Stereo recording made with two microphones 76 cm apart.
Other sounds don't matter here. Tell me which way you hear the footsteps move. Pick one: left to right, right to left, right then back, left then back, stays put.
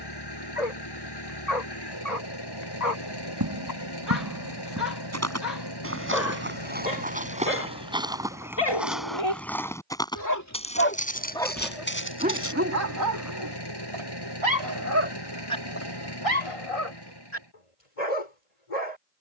right to left.